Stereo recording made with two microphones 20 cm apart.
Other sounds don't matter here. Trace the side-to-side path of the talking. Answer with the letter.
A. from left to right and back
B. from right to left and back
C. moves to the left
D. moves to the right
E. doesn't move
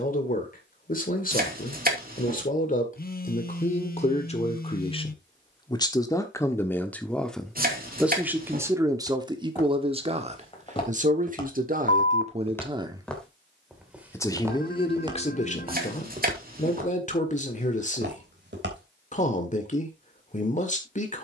A.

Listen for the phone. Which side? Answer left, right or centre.
left.